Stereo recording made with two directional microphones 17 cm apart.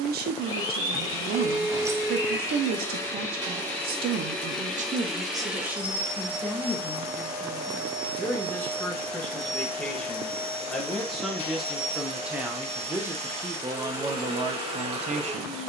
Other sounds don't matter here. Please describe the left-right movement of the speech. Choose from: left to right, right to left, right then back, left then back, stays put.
left then back.